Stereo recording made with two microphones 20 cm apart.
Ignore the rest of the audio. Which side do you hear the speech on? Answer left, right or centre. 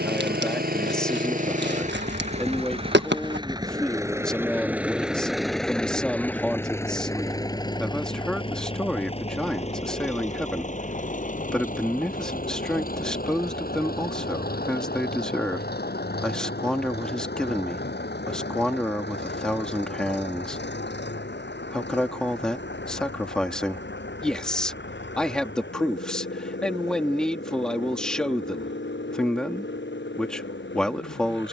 centre.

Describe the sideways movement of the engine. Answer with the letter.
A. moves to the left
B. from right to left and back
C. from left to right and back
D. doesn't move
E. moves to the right
A.